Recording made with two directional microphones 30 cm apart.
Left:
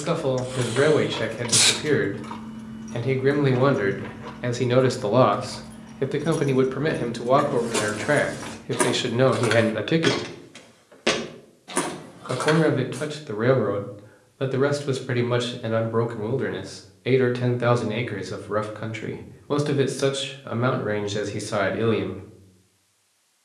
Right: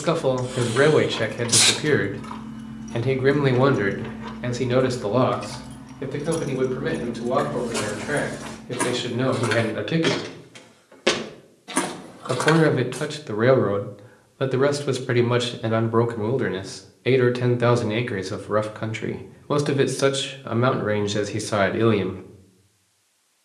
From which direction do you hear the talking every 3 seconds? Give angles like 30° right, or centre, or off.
20° right, centre, 40° left, 20° left, 20° right, 20° right, 20° right, 20° right.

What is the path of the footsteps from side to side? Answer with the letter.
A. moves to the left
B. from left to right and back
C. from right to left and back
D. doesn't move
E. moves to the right
E.